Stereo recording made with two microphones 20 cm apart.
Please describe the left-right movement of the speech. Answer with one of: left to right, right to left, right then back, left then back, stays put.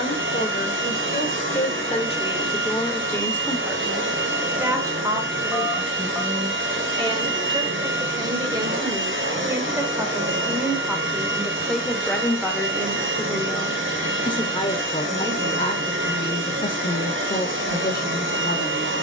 right then back.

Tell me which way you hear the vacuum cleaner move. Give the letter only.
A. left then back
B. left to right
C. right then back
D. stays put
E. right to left
D.